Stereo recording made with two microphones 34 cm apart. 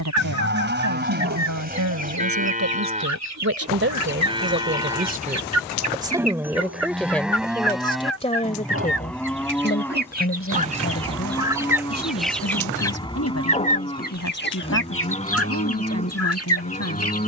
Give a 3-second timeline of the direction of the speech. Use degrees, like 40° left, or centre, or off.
60° right, 30° right, 10° left, 40° left, 50° left, 50° left.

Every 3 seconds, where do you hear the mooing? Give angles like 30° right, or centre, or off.
30° right, 10° right, centre, 10° left, 10° left, 20° left.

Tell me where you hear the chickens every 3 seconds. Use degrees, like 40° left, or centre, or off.
50° right, 50° right, 50° right, 20° right, 20° left, 40° left.